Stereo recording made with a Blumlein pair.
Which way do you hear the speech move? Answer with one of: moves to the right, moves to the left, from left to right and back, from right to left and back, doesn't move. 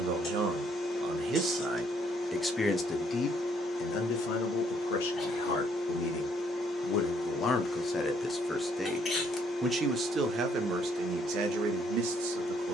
from right to left and back.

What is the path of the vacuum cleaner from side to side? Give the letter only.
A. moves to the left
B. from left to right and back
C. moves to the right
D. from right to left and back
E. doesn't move
E.